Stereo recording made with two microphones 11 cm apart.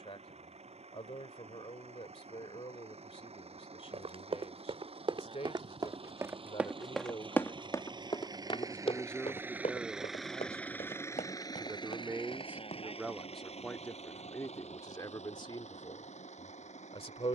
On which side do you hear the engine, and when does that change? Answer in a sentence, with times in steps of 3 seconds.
In this clip you hear the engine on the right from 0 s, in the centre from 9 s and on the left from 12 s.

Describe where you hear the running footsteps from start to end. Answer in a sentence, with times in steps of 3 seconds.
You can hear the running footsteps not at all from 0 s, on the right from 3 s, on the left from 6 s and not at all from 15 s.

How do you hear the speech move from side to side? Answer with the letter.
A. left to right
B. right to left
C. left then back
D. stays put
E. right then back
E.